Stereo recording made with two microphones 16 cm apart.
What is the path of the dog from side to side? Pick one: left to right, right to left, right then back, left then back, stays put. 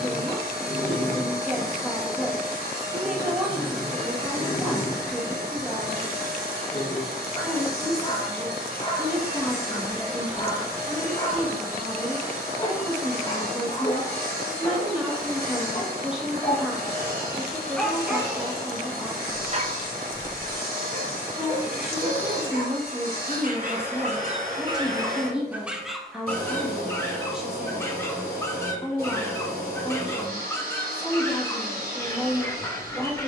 right then back.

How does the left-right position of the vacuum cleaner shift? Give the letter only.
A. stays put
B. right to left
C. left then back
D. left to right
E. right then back
A.